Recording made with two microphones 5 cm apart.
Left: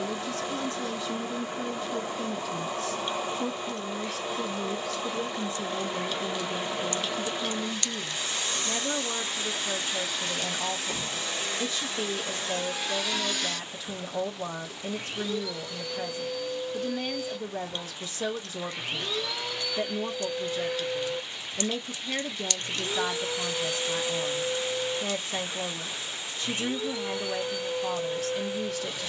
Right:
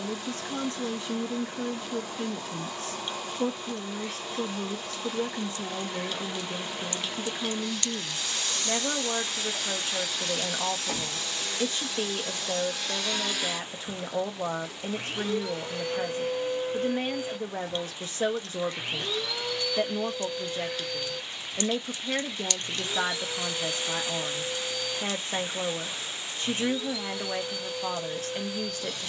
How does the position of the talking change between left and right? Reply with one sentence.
You can hear the talking stay in one place.